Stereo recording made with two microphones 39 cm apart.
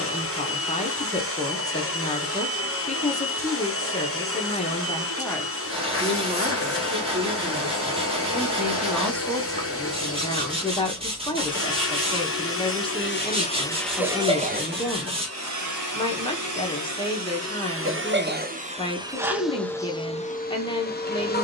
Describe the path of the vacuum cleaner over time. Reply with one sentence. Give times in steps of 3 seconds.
You can hear the vacuum cleaner on the left from 0 s, in the centre from 12 s, on the right from 15 s and in the centre from 18 s.